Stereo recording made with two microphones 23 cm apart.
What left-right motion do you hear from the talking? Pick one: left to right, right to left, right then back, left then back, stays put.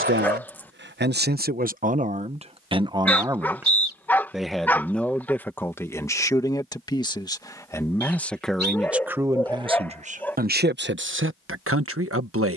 left then back.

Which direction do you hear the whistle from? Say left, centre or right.
right.